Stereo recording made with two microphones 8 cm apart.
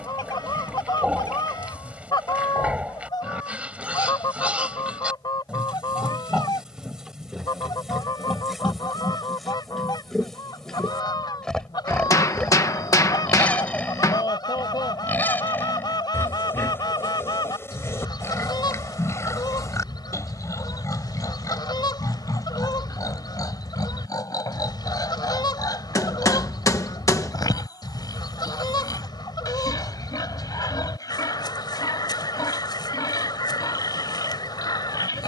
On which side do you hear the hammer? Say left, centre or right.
left.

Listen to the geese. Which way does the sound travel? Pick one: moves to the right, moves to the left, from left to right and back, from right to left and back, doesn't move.
doesn't move.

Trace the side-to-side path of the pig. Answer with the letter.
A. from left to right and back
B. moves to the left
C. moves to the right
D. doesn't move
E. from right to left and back
B.